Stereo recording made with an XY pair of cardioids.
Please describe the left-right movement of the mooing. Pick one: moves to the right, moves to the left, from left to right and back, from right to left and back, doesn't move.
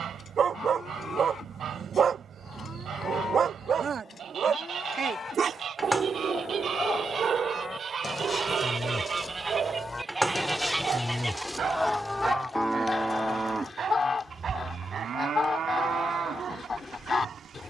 moves to the right.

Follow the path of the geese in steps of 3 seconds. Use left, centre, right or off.
right, right, right, centre, left, left.